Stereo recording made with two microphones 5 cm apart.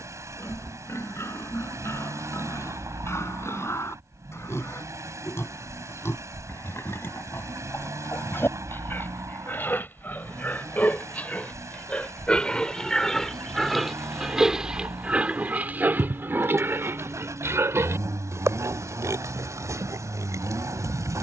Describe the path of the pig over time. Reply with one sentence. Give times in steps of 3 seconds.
In this clip you hear the pig on the left from 0 s, in the centre from 12 s and on the right from 15 s.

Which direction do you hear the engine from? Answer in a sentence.
You can hear the engine on the right.